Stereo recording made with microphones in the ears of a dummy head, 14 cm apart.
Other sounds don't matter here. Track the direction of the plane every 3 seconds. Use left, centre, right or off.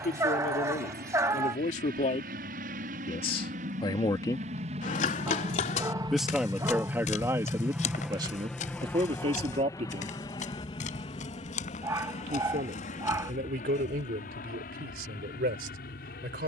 right, right, centre, left, left, left.